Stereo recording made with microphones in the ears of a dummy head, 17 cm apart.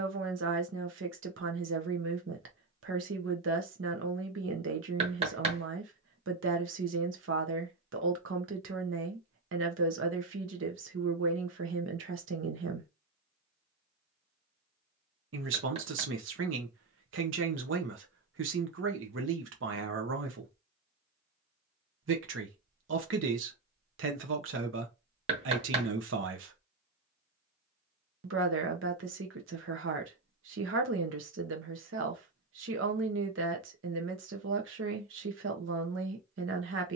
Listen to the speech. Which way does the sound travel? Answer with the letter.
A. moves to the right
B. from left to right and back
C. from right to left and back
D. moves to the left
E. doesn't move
E.